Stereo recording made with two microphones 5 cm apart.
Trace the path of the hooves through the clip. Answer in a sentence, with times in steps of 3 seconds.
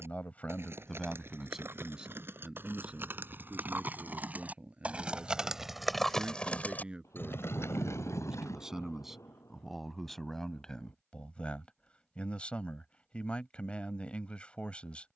In this clip you hear the hooves on the right from 0 s, on the left from 6 s and not at all from 9 s.